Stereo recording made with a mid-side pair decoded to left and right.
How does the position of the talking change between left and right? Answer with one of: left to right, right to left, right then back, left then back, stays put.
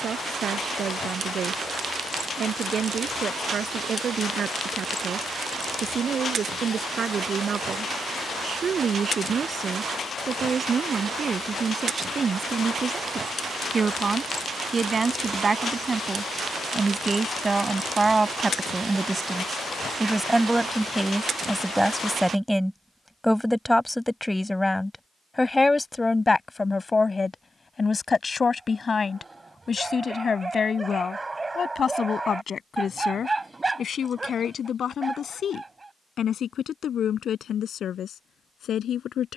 right to left.